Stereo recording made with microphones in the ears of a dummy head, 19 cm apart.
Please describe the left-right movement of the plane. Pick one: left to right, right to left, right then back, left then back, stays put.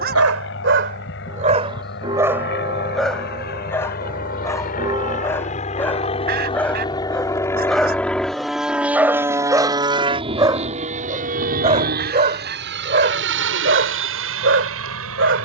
left to right.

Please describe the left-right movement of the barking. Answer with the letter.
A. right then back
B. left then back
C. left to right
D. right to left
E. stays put
B.